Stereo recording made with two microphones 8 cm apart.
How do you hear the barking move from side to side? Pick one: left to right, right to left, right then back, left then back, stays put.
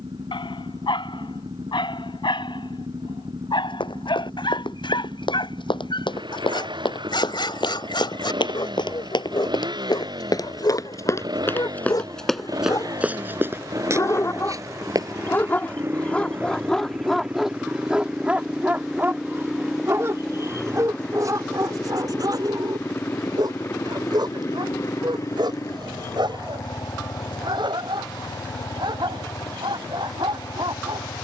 left to right.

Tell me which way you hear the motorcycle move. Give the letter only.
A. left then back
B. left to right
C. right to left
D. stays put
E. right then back
C.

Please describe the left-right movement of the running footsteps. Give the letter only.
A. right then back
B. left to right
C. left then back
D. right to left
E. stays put
B.